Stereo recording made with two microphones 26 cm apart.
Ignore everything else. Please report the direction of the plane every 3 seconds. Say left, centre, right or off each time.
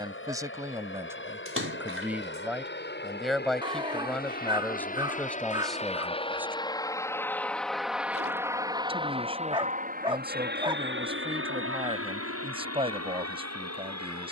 left, left, centre, right, right.